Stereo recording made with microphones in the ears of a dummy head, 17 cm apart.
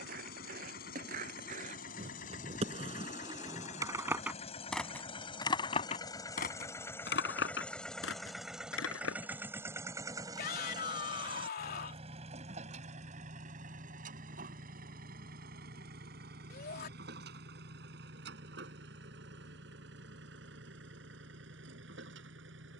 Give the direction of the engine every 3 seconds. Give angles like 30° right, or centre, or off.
50° left, 30° left, 10° left, 20° right, 40° right, 50° right, 60° right, 70° right.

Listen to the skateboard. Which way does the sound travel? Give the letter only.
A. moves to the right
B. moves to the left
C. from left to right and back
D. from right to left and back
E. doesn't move
B.